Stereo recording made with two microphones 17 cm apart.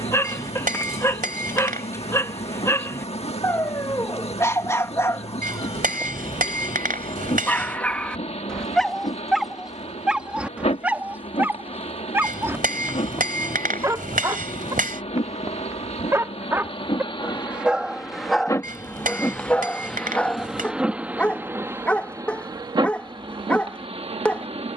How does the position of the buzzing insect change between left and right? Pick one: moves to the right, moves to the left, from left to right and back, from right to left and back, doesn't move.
moves to the right.